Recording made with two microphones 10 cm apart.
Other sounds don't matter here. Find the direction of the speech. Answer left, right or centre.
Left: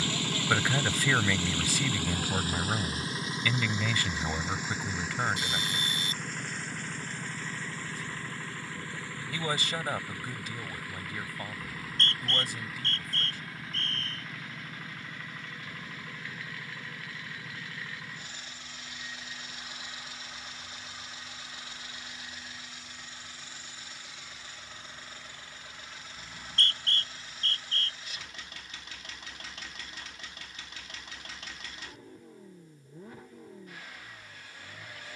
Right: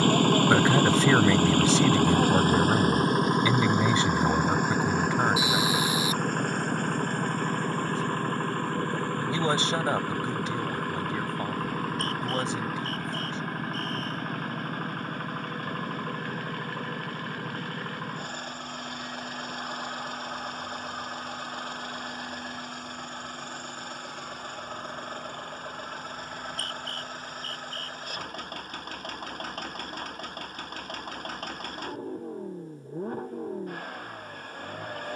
right.